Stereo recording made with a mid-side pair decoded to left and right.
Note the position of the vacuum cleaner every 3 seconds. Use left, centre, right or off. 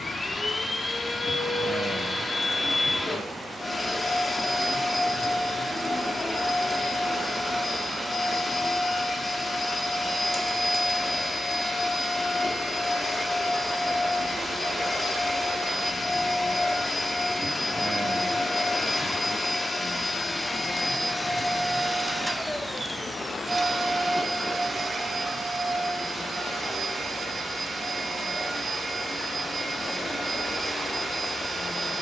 left, left, left, left, left, left, left, centre, right, right, right.